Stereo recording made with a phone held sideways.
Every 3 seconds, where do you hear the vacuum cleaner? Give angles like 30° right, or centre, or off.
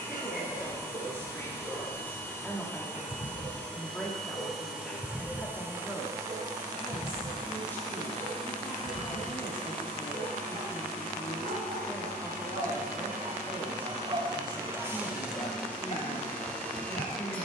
20° left, centre, 40° right, 60° right, 50° right, 10° left.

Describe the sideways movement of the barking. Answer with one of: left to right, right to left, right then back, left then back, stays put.
right then back.